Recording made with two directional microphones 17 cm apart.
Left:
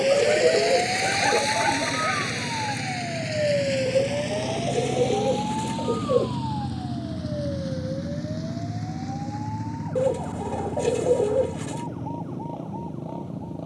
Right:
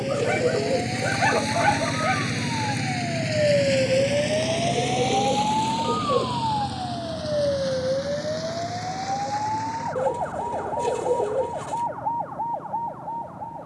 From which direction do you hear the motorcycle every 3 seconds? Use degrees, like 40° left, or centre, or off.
40° right, 10° right, 30° left, 50° left, 50° left.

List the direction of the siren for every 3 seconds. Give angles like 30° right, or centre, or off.
20° left, 30° right, 50° right, 60° right, 60° right.